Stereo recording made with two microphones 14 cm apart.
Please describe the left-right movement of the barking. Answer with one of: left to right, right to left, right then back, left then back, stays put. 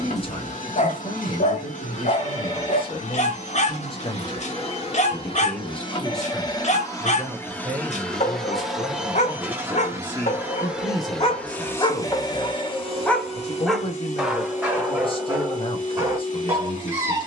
left to right.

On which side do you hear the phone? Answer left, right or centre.
left.